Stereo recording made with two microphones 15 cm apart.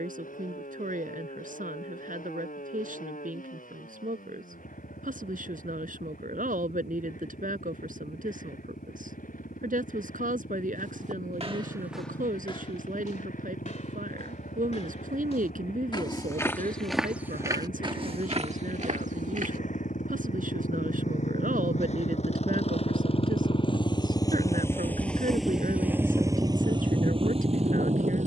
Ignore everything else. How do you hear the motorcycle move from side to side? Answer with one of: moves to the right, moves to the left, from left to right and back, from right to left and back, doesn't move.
moves to the right.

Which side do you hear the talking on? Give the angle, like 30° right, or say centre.
80° right.